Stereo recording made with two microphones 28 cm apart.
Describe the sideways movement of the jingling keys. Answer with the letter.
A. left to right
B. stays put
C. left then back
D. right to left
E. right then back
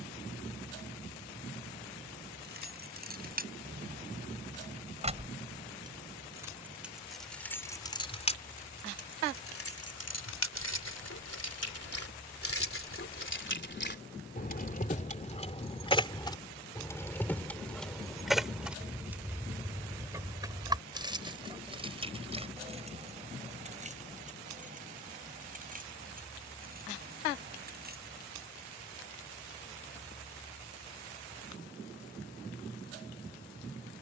C.